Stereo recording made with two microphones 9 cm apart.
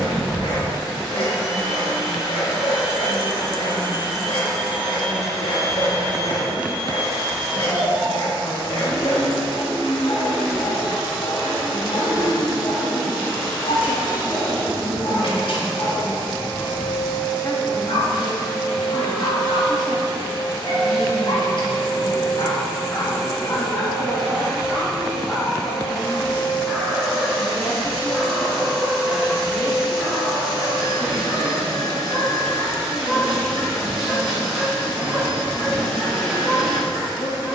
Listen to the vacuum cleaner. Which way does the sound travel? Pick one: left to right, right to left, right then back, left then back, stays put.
stays put.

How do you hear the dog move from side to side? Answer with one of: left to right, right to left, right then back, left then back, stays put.
left to right.